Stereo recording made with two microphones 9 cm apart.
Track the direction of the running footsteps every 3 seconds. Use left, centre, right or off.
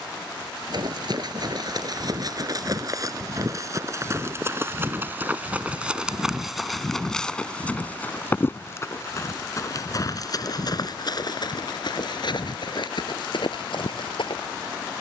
right, right, centre, left, left.